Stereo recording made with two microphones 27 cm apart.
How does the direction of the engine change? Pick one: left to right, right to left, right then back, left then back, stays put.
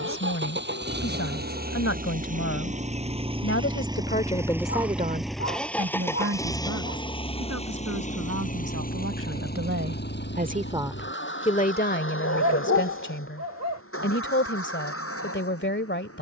right to left.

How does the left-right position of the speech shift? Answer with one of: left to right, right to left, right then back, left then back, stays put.
right then back.